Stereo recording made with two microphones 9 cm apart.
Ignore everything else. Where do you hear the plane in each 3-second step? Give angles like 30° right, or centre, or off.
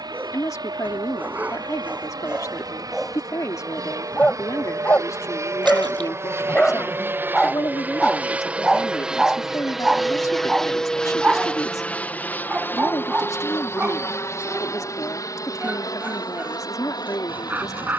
60° right, 40° right, 20° right, centre, 30° left, 50° left.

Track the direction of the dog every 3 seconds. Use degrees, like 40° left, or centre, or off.
20° right, 20° left, 10° left, 10° right, 20° right, 20° right.